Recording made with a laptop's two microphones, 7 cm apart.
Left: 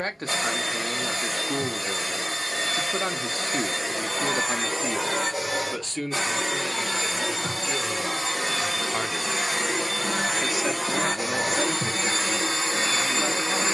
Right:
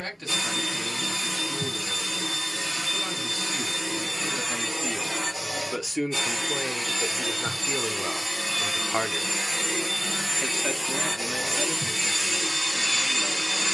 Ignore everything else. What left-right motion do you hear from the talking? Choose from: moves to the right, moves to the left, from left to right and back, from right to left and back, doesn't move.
from left to right and back.